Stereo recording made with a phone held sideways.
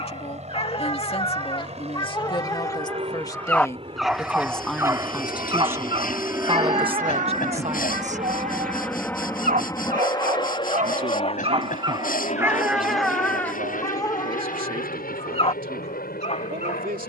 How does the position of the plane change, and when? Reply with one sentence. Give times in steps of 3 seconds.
You can hear the plane on the right from 0 s, in the centre from 6 s and on the left from 9 s.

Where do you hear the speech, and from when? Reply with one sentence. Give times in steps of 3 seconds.
You can hear the speech on the left from 0 s, in the centre from 3 s and on the right from 6 s.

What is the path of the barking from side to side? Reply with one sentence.
In this clip you hear the barking move from left to right and back again.